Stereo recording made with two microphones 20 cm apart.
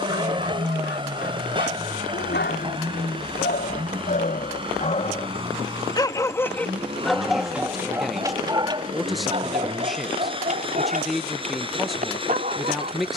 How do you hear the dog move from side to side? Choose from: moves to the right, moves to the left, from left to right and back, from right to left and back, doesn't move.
moves to the right.